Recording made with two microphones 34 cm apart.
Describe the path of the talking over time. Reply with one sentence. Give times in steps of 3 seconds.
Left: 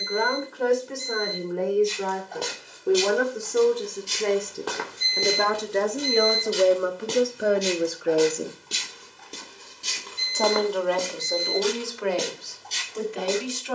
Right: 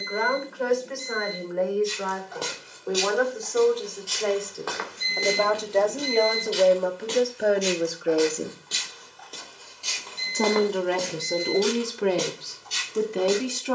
In this clip you hear the talking on the left from 0 s, in the centre from 6 s and on the right from 9 s.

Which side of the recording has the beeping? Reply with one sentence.
You can hear the beeping on the right.